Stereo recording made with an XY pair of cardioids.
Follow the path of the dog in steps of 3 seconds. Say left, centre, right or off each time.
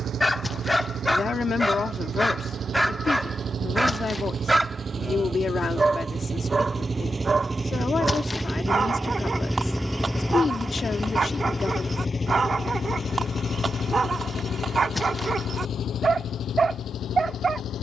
centre, centre, right, right, right, right.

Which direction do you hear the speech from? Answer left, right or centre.
left.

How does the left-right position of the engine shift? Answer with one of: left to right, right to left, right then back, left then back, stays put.
right to left.